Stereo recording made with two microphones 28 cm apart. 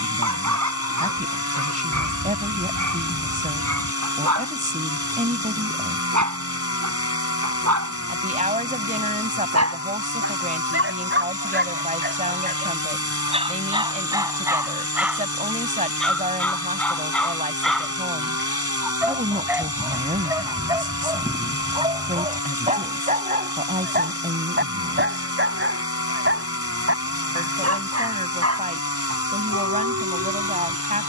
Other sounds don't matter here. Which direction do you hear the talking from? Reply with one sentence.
In this clip you hear the talking on the right.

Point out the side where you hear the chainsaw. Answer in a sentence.
You can hear the chainsaw on the left.